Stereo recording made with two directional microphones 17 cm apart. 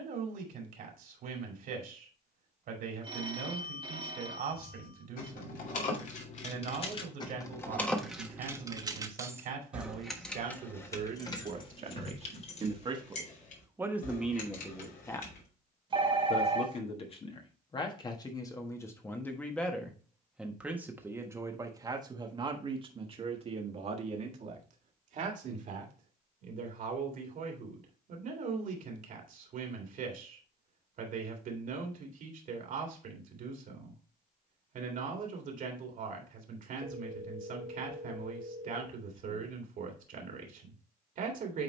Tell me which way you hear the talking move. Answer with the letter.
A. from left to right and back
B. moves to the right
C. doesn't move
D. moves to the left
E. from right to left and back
E.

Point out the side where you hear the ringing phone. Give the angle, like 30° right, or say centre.
30° right.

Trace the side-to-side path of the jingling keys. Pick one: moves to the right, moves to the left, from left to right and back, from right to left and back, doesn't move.
from left to right and back.